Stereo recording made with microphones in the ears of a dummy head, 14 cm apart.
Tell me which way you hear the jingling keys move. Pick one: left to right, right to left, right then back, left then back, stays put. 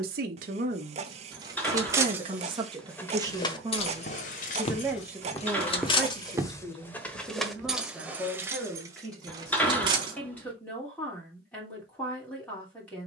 left then back.